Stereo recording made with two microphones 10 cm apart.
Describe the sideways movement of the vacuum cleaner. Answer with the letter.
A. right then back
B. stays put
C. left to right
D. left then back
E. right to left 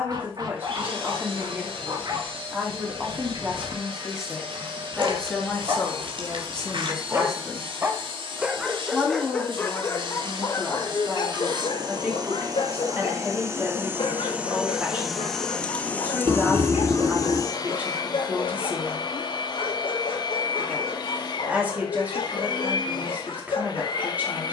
E.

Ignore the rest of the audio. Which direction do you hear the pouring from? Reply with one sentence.
You can hear the pouring on the right.